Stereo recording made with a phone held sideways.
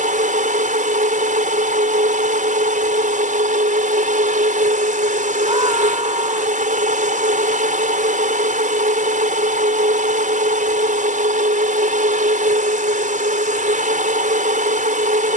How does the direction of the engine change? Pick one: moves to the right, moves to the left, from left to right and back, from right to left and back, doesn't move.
doesn't move.